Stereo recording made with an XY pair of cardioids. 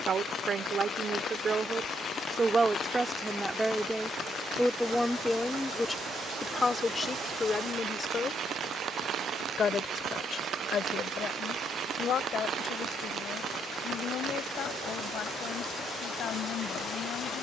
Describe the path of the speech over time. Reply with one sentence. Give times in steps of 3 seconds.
You can hear the speech on the right from 0 s, in the centre from 3 s and on the left from 6 s.